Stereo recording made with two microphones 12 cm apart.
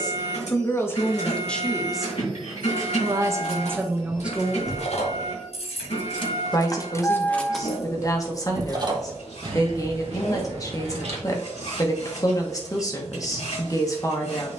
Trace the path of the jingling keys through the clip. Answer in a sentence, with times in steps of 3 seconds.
In this clip you hear the jingling keys not at all from 0 s, on the left from 3 s, in the centre from 6 s, on the right from 9 s and not at all from 12 s.